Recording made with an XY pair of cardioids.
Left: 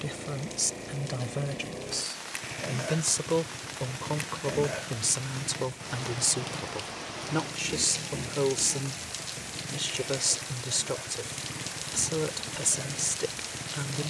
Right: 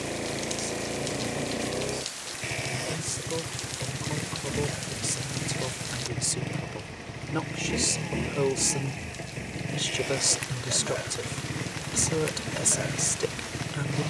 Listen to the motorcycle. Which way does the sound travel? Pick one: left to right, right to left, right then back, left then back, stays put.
stays put.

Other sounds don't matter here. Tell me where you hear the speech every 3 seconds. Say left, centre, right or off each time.
left, left, centre, centre, centre.